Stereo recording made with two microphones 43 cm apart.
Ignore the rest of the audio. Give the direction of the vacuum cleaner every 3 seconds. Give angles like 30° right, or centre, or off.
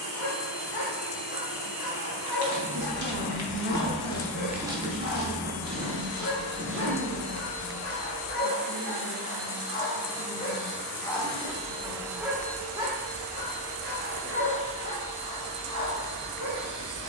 20° left, 10° left, 40° right, 40° right, 10° left, 20° left.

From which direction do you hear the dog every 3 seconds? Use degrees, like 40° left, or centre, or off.
50° left, 50° left, 30° left, 10° left, 20° right, 40° right.